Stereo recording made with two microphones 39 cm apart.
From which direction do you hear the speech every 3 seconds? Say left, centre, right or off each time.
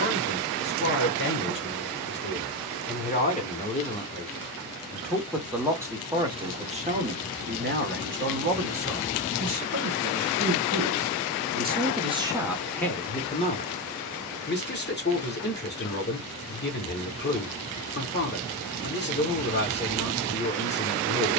left, centre, right, right, centre, left, left.